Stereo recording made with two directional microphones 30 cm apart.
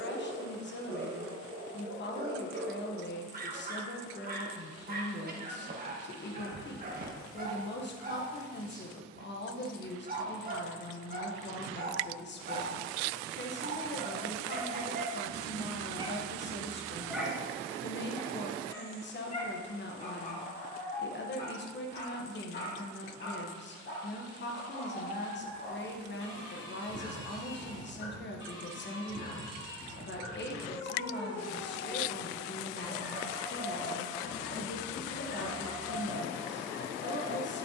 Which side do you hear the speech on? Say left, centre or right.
left.